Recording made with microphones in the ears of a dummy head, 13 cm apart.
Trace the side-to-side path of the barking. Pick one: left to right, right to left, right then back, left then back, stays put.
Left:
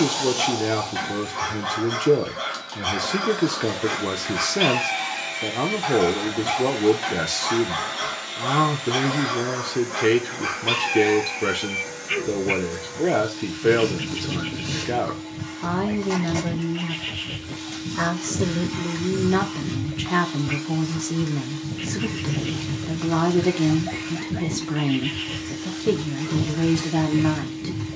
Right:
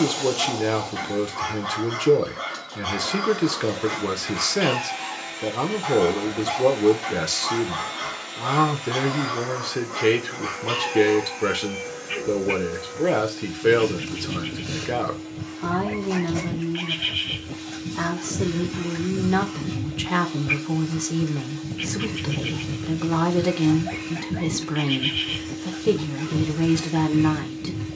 left to right.